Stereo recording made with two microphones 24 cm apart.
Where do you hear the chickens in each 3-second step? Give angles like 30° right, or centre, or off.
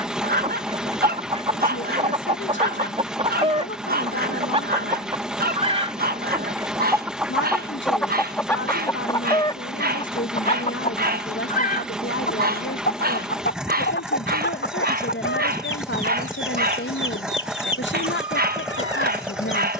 20° right, 20° right, centre, 30° left, 50° left, 60° left, 60° left.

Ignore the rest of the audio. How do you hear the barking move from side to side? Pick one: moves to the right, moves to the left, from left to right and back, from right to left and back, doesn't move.
doesn't move.